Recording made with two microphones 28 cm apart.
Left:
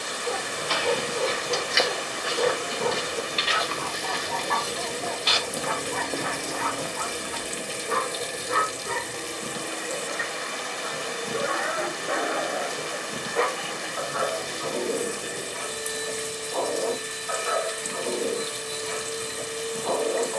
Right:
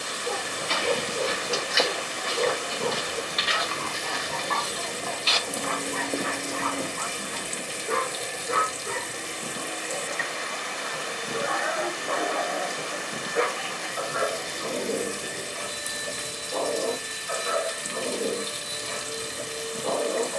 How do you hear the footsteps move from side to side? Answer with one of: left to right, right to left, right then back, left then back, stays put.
left then back.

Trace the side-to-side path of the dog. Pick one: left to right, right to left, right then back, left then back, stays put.
left then back.